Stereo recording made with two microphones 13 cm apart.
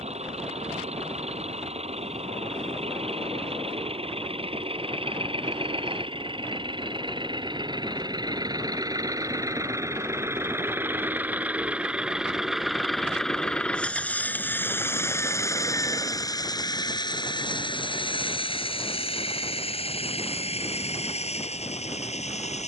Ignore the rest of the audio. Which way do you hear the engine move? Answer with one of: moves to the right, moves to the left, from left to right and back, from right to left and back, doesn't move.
moves to the left.